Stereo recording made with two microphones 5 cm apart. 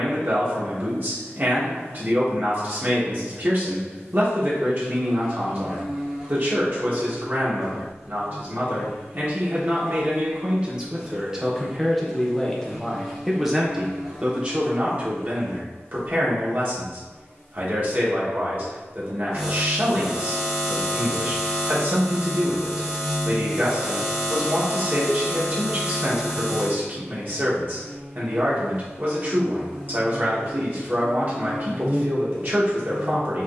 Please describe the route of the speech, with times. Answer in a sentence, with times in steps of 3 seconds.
In this clip you hear the speech on the right from 0 s, in the centre from 12 s and on the right from 15 s.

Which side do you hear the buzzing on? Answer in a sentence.
In this clip you hear the buzzing in the centre.